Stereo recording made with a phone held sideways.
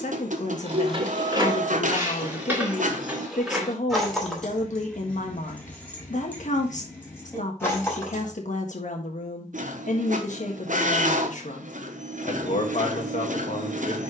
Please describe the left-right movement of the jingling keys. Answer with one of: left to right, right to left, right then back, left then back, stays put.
right to left.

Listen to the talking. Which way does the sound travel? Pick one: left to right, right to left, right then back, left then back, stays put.
stays put.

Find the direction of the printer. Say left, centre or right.
right.